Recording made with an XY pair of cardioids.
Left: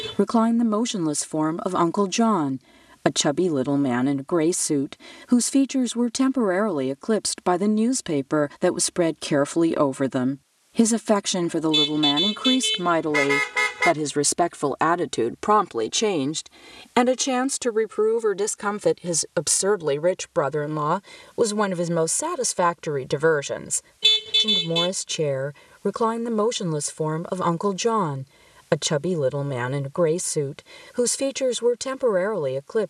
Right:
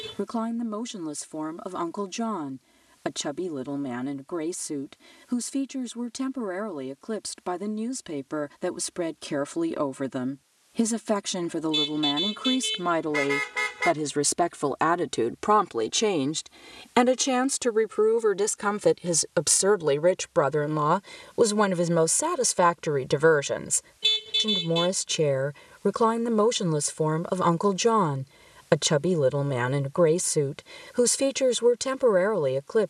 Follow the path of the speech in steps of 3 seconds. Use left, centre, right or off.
left, left, left, left, left, centre, centre, centre, centre, centre, centre.